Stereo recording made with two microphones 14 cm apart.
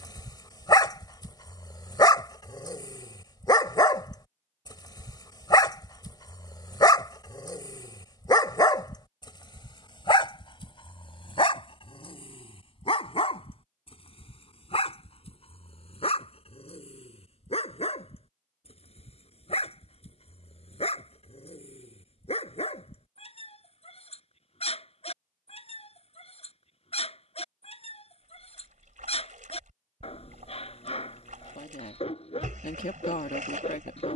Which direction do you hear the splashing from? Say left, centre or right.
right.